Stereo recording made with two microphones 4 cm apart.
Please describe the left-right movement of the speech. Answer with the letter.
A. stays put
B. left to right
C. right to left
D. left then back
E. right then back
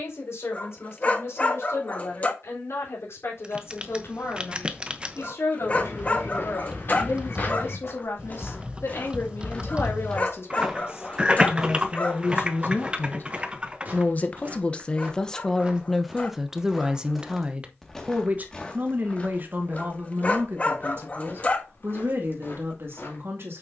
B.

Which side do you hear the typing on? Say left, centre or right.
right.